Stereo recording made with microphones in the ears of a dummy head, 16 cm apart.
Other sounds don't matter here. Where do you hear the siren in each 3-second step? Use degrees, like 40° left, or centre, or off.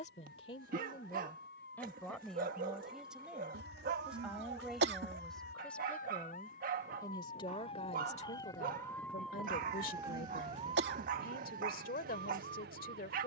70° left, 60° left, 40° left, 30° right, 60° right.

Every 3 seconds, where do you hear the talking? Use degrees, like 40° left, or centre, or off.
20° left, centre, 30° left, 50° left, 50° left.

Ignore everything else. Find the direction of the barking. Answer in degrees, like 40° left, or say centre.
50° right.